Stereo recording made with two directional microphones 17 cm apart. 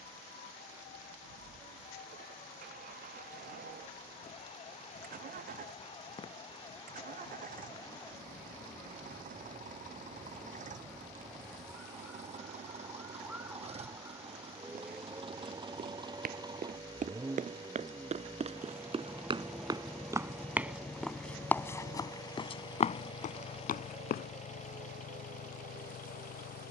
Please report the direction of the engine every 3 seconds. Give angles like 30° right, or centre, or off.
60° right, 50° right, 50° right, 40° right, 40° right, 20° right, centre, 20° left, 50° left.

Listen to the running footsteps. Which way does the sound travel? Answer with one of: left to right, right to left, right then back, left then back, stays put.
right to left.